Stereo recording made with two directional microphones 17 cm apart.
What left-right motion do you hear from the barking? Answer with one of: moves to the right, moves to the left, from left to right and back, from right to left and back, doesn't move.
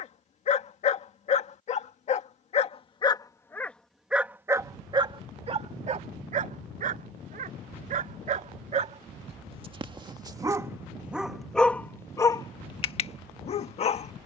from left to right and back.